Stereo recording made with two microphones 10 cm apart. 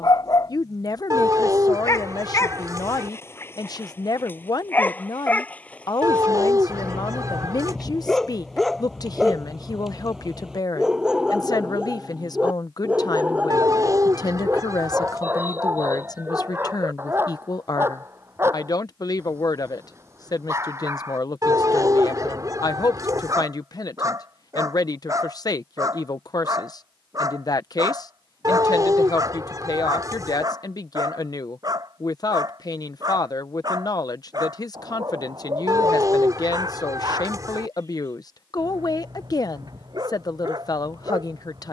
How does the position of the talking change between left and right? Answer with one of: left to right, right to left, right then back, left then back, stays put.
stays put.